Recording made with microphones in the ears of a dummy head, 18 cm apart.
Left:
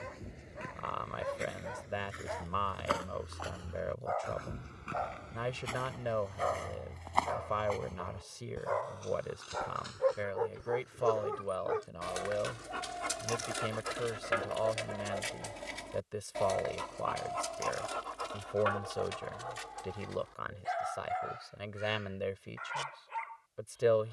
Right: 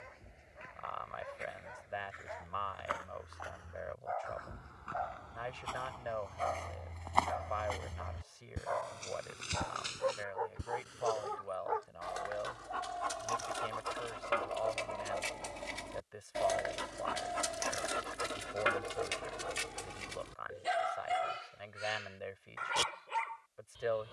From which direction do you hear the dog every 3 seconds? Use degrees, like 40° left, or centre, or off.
70° left, 70° left, 60° left, 50° left, 30° left, 10° right, 30° right, 50° right.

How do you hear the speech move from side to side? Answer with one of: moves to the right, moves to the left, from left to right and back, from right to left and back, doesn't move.
doesn't move.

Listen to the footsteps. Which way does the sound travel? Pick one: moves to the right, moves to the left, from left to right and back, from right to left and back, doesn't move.
moves to the right.